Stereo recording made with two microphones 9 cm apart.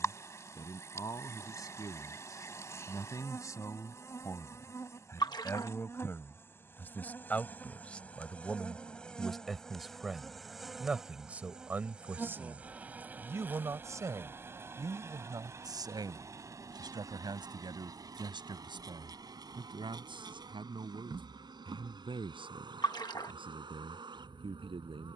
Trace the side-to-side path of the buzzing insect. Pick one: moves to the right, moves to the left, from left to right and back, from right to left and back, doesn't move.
moves to the right.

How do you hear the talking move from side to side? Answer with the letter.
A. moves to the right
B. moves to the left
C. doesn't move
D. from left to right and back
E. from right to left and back
A.